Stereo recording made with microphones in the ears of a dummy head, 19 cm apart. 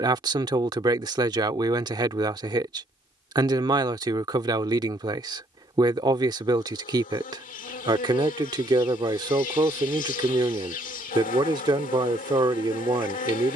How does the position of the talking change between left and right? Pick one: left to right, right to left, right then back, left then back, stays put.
stays put.